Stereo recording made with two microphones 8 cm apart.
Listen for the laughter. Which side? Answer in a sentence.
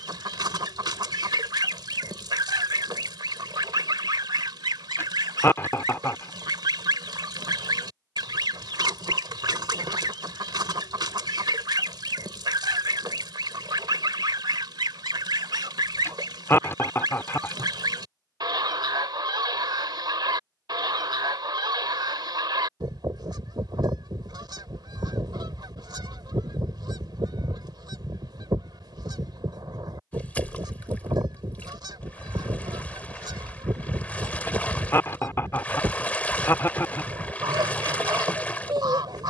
In this clip you hear the laughter on the left.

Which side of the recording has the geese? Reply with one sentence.
You can hear the geese on the right.